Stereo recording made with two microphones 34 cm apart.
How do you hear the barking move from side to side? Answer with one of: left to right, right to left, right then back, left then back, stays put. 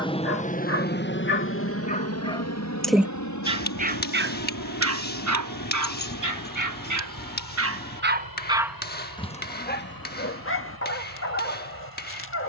right then back.